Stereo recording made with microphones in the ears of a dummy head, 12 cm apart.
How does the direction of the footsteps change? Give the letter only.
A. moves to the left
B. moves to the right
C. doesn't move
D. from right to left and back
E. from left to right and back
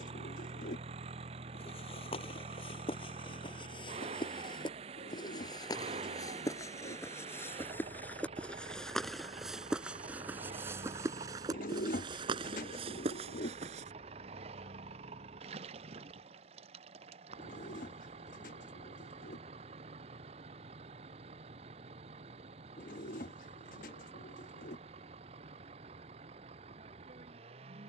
B.